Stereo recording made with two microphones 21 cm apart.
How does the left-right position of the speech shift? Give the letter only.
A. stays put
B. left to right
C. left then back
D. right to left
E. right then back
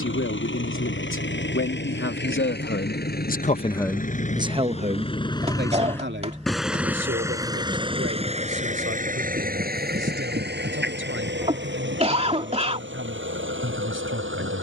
B.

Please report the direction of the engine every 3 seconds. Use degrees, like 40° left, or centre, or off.
60° left, 30° left, 20° right, 50° right, 60° right.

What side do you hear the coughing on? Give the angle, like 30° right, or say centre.
30° right.